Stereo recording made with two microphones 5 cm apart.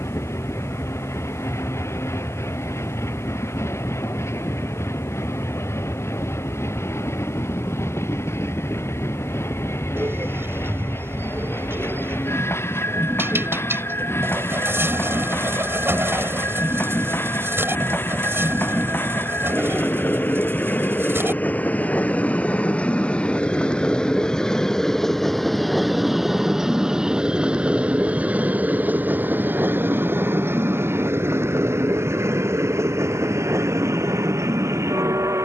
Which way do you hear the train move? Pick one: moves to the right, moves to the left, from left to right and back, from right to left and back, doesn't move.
moves to the right.